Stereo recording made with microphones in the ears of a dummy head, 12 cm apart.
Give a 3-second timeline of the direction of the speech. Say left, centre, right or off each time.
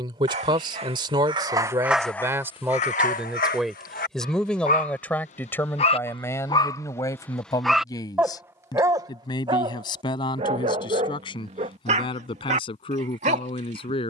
right, centre, left, left, left.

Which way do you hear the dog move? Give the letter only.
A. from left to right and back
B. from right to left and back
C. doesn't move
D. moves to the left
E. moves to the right
B.